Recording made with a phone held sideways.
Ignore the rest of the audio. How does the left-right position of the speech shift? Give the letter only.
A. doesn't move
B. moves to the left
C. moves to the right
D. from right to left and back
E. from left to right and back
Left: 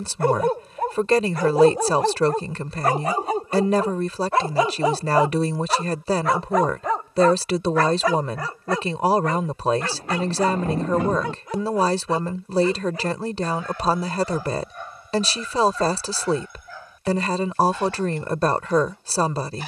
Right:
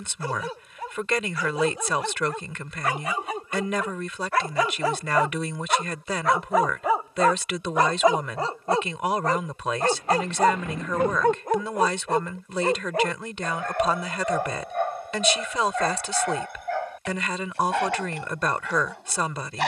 A.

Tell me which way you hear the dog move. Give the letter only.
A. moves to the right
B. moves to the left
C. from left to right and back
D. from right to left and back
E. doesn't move
A.